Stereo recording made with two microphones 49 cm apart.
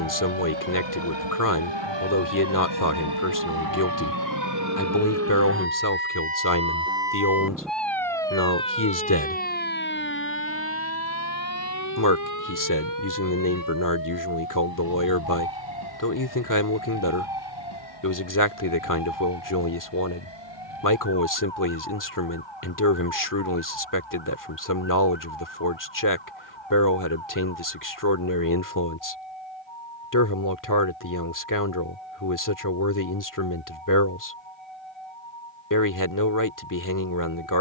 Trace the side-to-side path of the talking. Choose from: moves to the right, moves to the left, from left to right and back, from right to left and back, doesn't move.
doesn't move.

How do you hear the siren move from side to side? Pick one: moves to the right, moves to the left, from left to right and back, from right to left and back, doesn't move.
moves to the left.